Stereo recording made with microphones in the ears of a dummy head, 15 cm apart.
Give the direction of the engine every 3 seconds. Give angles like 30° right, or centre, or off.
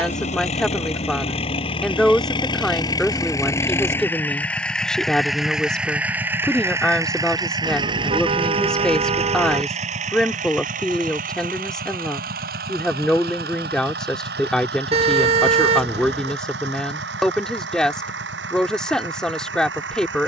30° left, 10° left, 20° right, 40° right, 60° right, 70° right, 70° right.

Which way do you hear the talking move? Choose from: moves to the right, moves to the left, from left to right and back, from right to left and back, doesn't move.
doesn't move.